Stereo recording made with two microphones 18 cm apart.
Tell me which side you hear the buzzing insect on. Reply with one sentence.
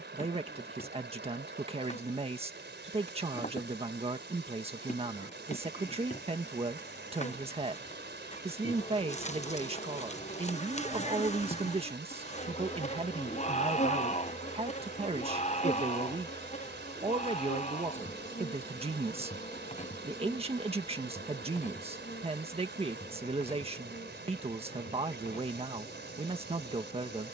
You can hear the buzzing insect on the left.